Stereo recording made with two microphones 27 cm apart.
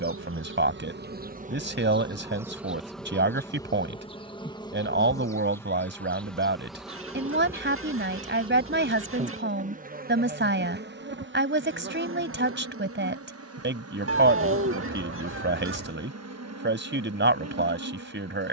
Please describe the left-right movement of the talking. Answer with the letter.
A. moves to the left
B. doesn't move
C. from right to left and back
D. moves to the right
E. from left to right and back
B.